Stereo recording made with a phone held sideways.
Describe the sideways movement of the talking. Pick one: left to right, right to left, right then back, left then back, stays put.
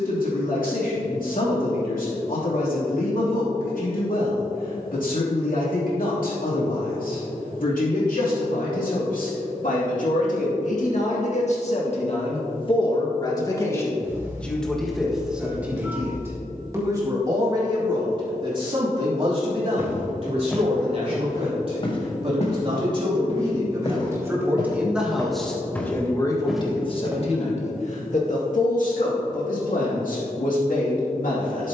right then back.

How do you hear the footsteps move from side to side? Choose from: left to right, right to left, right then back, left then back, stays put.
left then back.